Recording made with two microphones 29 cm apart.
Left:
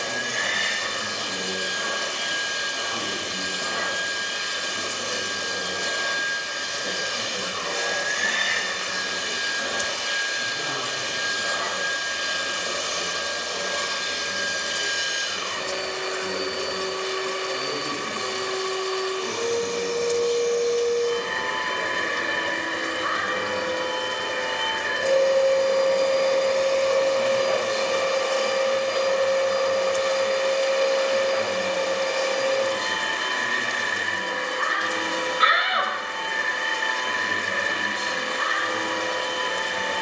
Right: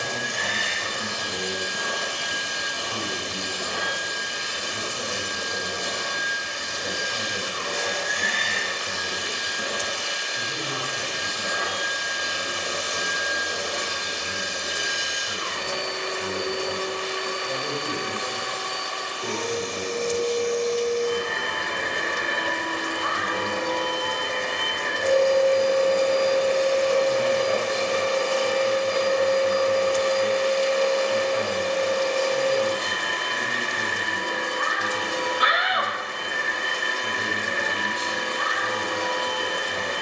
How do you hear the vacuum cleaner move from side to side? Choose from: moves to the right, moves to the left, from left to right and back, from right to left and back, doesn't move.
from right to left and back.